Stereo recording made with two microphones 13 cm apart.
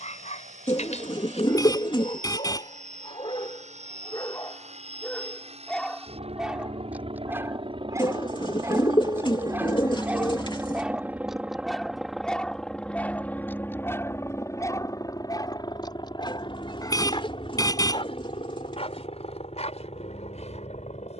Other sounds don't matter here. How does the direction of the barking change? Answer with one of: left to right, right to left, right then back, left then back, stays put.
right then back.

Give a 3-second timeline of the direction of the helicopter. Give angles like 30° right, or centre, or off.
70° right, 60° right, 40° right, 20° right, 10° left, 30° left, 50° left.